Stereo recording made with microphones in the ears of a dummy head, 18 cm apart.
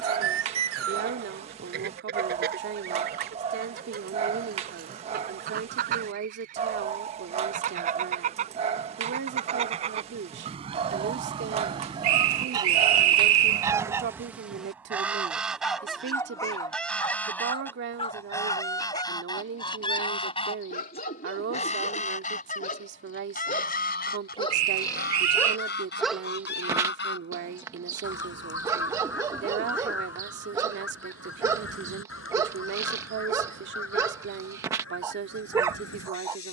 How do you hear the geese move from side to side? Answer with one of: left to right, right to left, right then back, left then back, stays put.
right to left.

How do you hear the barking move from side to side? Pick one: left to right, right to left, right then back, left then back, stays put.
left then back.